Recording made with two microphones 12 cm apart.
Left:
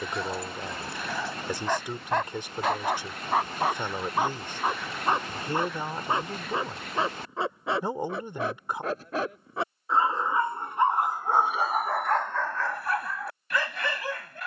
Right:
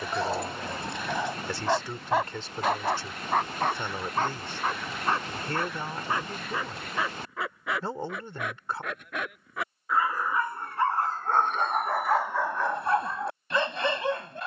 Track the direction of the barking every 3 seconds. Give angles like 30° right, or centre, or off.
20° right, 10° left, 30° left, 20° left, 20° right.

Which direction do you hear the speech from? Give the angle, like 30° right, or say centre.
20° left.